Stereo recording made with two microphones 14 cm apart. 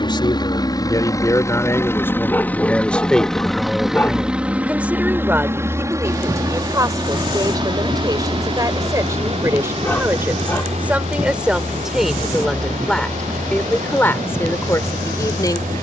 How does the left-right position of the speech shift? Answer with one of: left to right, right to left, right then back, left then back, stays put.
right then back.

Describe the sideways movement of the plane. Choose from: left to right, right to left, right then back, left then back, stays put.
left to right.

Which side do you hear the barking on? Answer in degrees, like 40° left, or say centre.
10° left.